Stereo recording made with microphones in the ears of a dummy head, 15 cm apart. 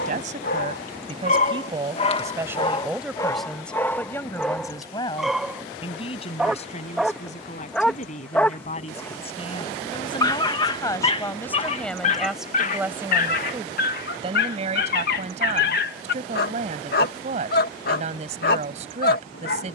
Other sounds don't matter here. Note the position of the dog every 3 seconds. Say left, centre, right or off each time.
left, centre, centre, left, left, left, left.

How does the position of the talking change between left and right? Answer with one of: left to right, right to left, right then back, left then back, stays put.
left then back.